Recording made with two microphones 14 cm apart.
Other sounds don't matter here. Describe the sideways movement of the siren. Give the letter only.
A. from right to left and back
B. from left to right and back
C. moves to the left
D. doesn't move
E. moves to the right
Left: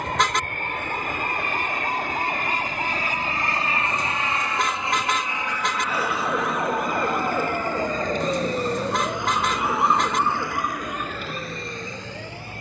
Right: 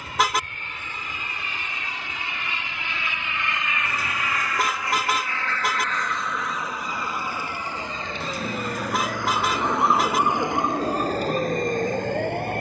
E.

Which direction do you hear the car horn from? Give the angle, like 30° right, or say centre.
10° right.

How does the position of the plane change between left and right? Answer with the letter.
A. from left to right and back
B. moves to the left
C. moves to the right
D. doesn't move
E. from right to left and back
C.